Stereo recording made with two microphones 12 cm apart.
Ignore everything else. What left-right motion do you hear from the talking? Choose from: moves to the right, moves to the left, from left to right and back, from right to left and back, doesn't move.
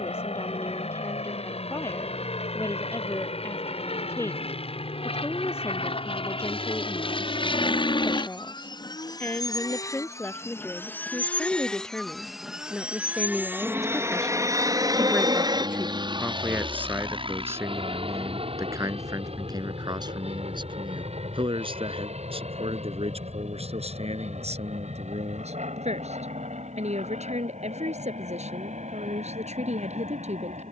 moves to the right.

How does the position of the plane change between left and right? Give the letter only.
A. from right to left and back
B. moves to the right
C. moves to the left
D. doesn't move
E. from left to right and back
B.